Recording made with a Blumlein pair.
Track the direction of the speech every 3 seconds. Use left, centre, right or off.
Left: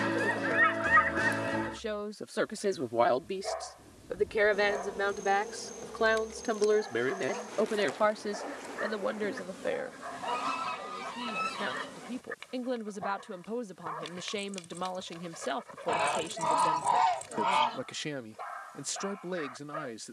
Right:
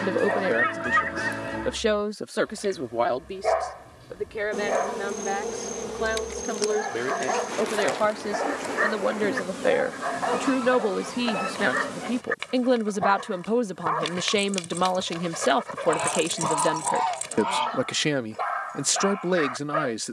right, centre, centre, right, right, right, right.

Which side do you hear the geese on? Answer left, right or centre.
centre.